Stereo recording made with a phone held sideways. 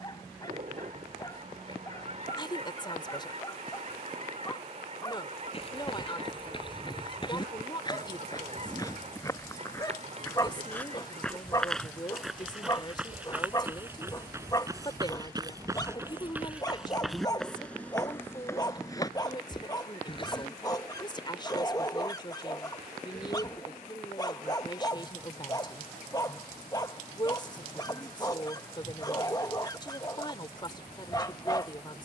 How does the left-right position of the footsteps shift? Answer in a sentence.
In this clip you hear the footsteps move from left to right and back again.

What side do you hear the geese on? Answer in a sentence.
You can hear the geese on the right.